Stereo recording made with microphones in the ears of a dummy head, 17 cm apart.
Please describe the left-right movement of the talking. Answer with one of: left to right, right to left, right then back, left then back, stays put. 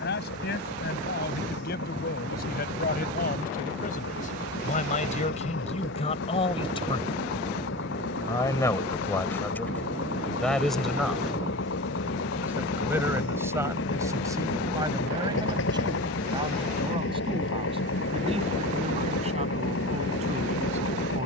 left to right.